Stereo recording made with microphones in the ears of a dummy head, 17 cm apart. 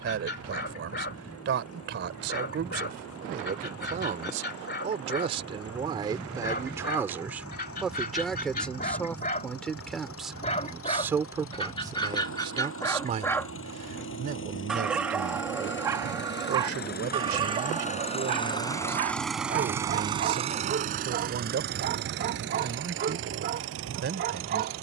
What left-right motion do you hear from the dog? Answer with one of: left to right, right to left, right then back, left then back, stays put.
left to right.